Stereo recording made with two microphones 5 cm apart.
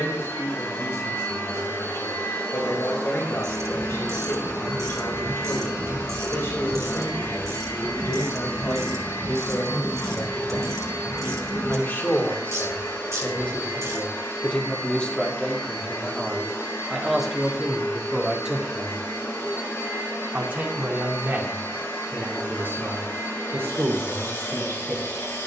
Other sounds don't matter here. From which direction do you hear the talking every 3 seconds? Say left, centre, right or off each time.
left, left, left, left, left, centre, right, right, right.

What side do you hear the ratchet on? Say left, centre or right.
right.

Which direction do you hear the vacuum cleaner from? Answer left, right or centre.
left.